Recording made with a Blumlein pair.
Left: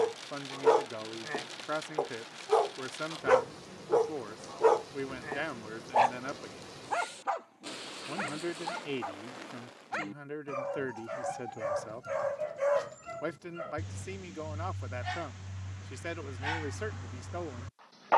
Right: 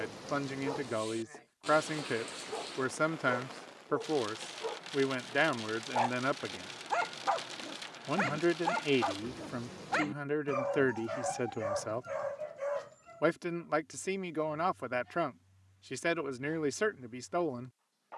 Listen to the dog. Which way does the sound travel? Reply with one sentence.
You can hear the dog move from left to right and back again.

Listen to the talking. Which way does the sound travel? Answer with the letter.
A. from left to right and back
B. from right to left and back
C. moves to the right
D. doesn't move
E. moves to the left
D.